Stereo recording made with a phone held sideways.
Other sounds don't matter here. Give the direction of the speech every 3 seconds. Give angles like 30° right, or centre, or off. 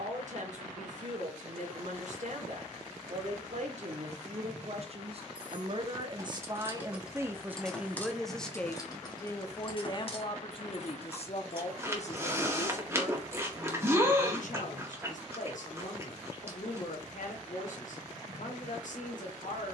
60° right, 50° right, 10° right, 40° left, 60° left, 70° left, 70° left.